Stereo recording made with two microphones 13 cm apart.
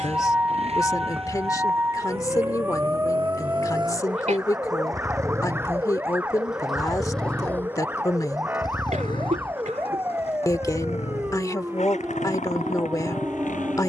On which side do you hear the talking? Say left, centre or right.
left.